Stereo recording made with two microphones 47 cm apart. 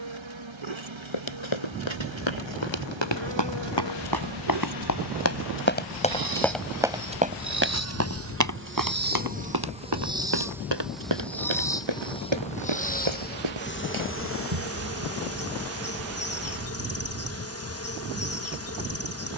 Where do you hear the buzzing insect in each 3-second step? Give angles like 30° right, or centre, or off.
70° right, 60° right, 30° right, 10° right, 20° left, 30° left, 30° left.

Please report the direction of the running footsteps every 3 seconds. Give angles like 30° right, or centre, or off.
70° left, 40° left, 20° right, 50° right, 70° right, off, off.